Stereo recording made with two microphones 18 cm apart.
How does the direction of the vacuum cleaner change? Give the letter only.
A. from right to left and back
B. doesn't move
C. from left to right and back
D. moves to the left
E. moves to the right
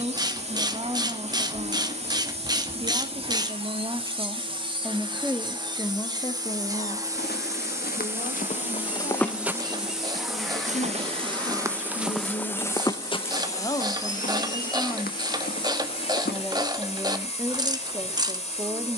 D.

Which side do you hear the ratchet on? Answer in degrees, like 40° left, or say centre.
20° right.